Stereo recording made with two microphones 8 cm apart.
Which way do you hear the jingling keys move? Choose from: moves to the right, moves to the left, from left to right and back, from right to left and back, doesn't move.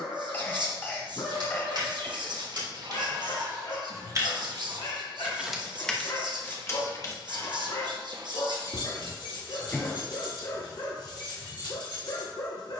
moves to the left.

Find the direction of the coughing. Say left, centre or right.
left.